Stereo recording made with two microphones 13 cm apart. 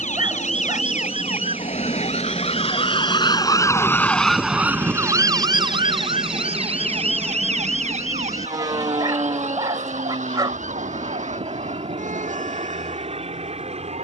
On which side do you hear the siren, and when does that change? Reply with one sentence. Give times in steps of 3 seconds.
You can hear the siren on the left from 0 s, in the centre from 3 s and on the right from 6 s.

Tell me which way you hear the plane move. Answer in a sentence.
You can hear the plane go from the left side to the right.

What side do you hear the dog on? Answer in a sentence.
In this clip you hear the dog on the right.